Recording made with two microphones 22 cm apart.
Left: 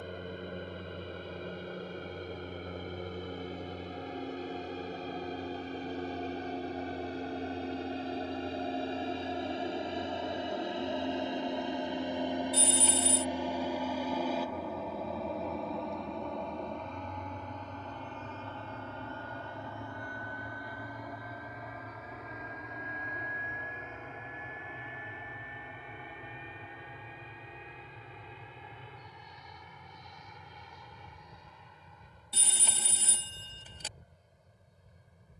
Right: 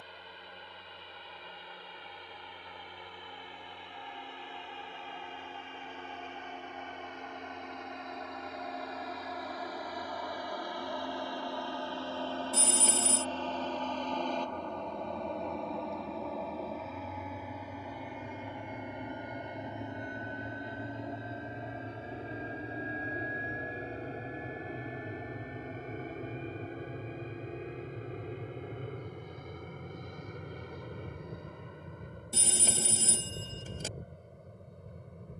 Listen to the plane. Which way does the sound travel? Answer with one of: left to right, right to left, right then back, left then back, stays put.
left to right.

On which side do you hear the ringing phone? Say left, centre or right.
right.